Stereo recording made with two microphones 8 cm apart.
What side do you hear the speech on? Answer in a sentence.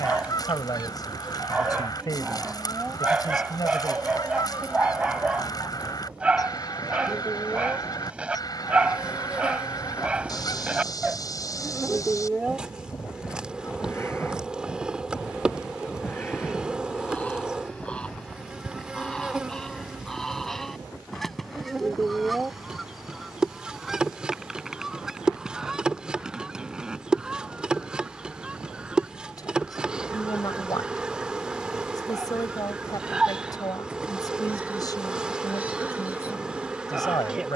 You can hear the speech on the left.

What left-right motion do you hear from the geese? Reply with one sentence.
In this clip you hear the geese travel towards the right.